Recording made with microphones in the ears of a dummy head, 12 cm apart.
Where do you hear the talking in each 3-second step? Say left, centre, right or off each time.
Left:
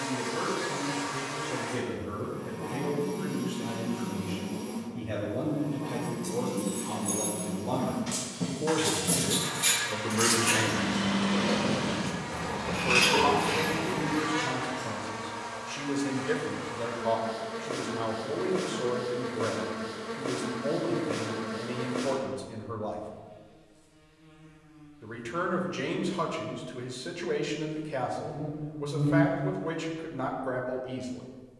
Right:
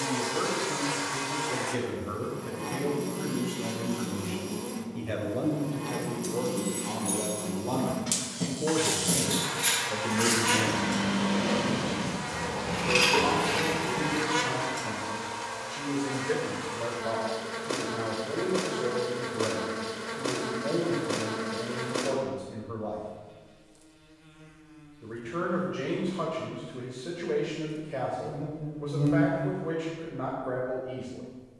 right, right, centre, left, left, left, left, left, left, left, left.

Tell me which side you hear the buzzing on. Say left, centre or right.
right.